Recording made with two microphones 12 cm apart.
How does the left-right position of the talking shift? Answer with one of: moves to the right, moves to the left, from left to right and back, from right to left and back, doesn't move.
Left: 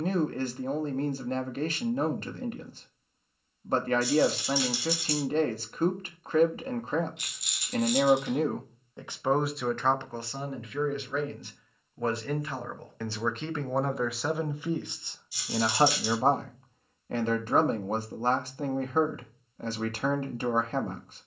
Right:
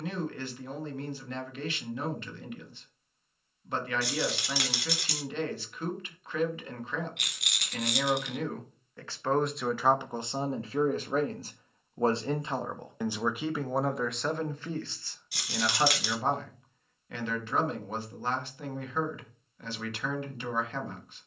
from left to right and back.